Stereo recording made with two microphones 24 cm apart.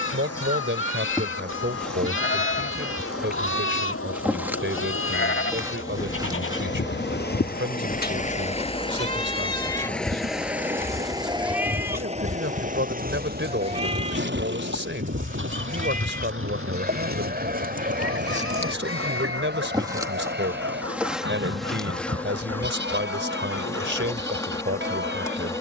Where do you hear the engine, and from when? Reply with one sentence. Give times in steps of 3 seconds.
You can hear the engine on the left from 0 s, in the centre from 9 s and on the right from 12 s.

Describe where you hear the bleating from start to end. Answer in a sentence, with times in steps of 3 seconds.
You can hear the bleating on the left from 0 s, in the centre from 9 s and on the right from 12 s.